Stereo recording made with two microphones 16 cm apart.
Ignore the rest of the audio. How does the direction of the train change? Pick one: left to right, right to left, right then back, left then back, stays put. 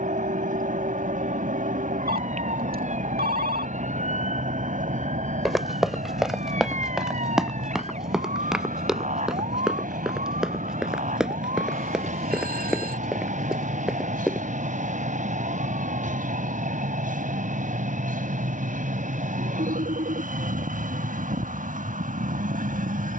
stays put.